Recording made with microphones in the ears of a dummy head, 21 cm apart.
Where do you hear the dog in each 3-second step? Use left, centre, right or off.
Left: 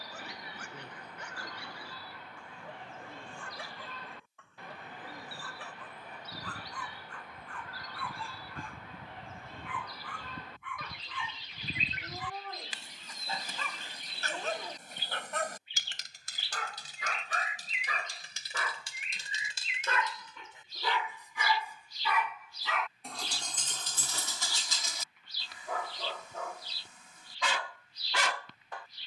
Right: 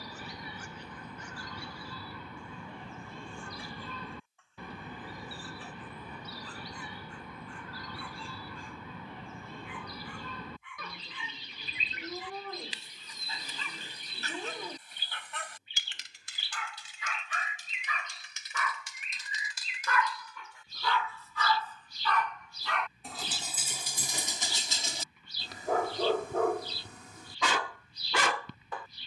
left, left, left, left, left, left, left, centre, right, right.